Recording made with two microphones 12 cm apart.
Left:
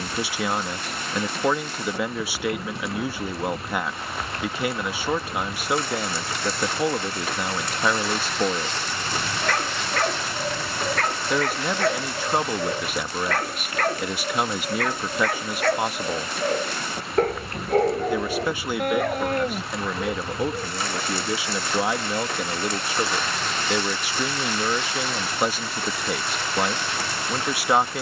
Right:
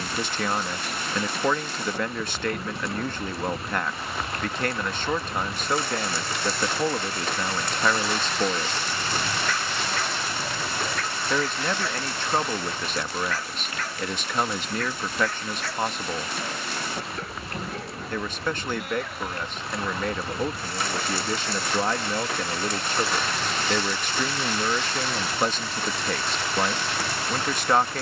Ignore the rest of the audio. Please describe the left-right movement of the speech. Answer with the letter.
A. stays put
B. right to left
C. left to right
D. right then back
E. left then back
A.